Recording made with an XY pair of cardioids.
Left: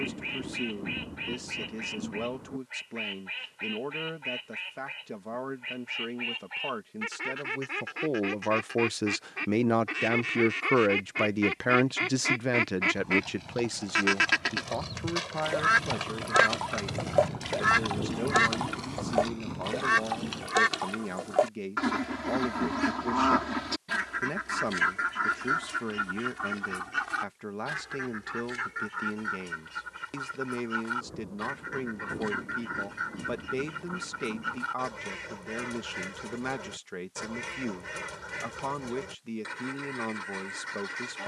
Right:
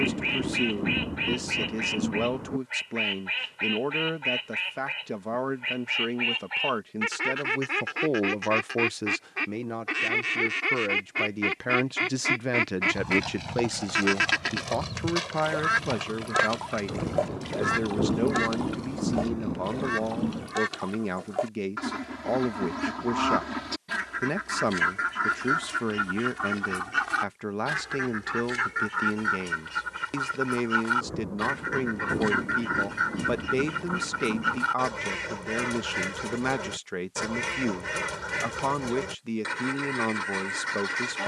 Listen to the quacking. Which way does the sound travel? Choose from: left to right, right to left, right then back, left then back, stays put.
left then back.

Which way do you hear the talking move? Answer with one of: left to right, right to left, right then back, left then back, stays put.
left then back.